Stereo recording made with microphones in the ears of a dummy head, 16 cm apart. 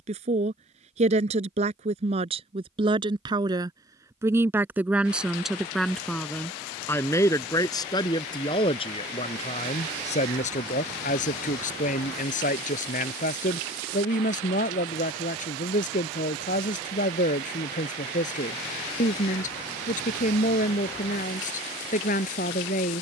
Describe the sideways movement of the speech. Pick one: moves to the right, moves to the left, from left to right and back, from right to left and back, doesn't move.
moves to the left.